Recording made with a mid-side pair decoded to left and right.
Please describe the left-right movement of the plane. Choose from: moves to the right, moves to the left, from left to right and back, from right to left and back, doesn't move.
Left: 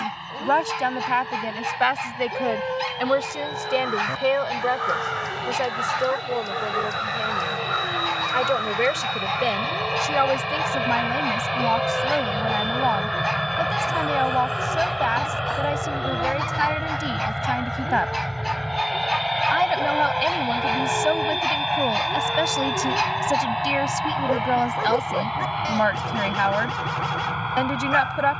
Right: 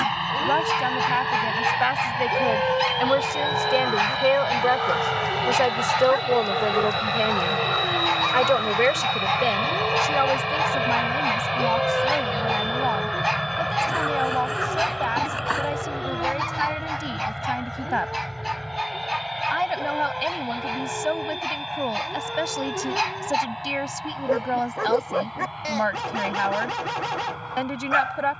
moves to the left.